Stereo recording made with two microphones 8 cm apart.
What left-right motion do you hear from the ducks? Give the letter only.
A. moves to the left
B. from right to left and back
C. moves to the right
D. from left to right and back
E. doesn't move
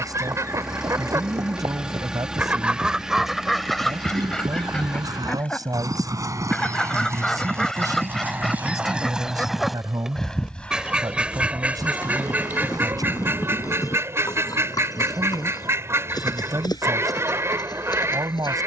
B.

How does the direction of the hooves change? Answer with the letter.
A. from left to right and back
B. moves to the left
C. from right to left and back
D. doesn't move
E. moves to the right
B.